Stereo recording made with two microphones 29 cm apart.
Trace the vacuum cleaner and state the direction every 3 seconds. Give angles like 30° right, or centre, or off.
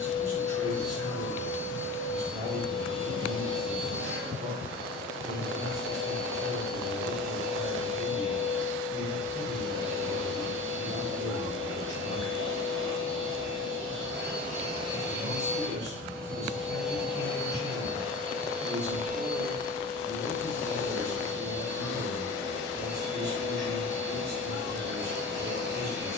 50° right, 50° right, 50° right, 50° right, 40° right, centre, 30° right, 40° right, 40° right.